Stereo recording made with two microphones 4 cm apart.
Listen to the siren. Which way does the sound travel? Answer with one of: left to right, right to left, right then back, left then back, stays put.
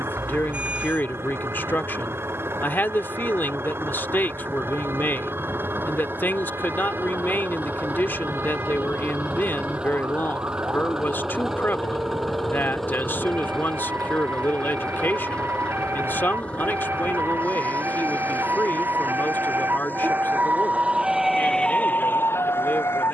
right to left.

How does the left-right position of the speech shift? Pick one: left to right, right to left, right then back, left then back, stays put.
stays put.